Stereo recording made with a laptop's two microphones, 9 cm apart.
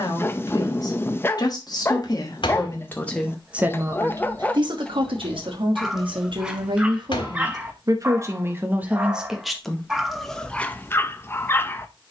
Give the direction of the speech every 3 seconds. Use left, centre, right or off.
left, right, right, centre.